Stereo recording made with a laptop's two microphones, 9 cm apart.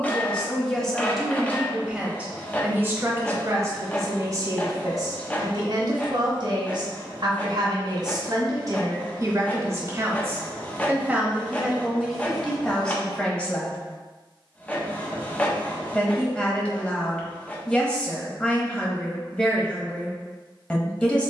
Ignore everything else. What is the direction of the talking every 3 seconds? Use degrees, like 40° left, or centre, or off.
centre, 40° right, 50° right, 20° right, 10° left, 10° left, 10° left.